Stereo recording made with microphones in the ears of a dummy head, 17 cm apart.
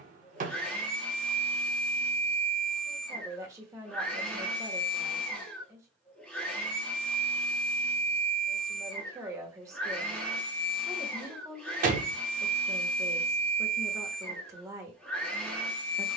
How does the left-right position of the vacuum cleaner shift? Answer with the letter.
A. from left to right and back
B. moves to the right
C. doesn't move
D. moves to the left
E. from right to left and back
C.